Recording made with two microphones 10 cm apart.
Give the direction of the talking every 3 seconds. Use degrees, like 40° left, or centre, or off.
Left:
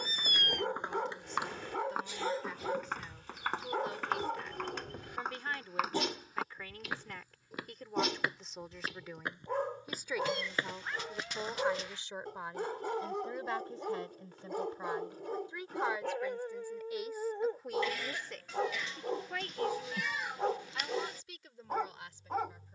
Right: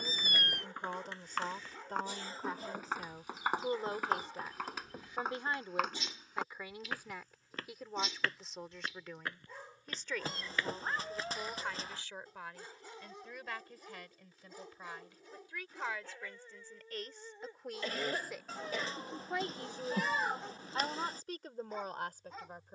50° right, 30° right, 10° right, 10° left, 30° left, 10° left, 20° right, 50° right.